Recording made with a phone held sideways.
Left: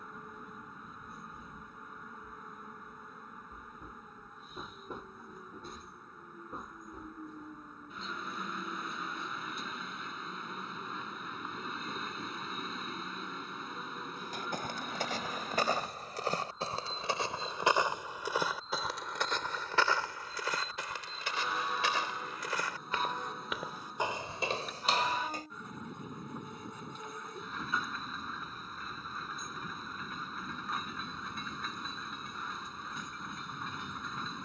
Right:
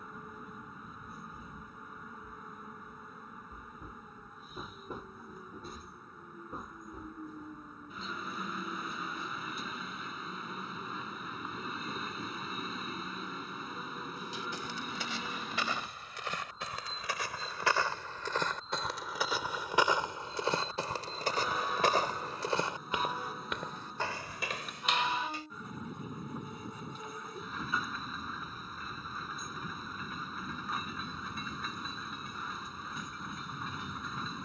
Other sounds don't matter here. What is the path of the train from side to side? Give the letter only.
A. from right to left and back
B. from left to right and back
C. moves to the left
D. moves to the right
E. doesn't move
E.